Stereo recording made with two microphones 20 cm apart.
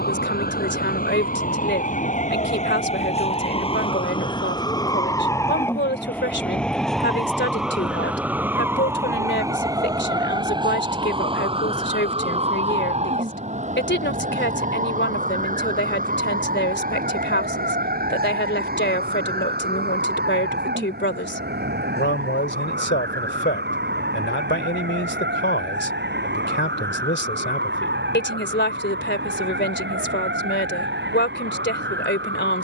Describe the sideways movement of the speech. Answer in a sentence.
In this clip you hear the speech stay put.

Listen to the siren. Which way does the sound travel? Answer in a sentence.
You can hear the siren travel towards the right.